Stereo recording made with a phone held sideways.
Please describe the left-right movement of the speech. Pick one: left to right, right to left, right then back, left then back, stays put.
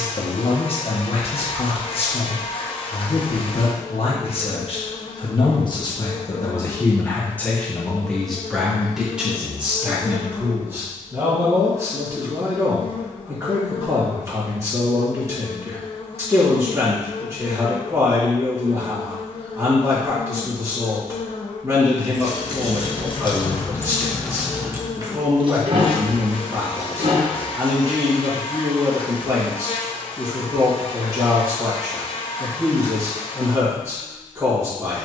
left to right.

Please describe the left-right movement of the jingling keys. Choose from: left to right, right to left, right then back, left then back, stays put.
left to right.